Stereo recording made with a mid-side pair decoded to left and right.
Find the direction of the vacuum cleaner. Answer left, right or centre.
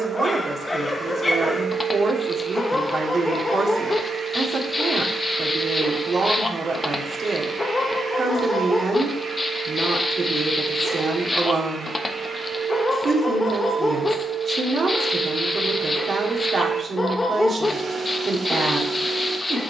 right.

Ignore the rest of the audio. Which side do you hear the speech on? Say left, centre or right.
right.